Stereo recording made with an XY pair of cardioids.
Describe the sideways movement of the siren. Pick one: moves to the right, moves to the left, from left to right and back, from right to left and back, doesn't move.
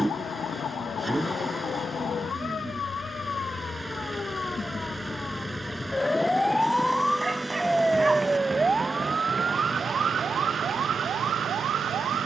moves to the right.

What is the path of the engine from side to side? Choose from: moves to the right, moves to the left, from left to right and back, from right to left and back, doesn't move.
doesn't move.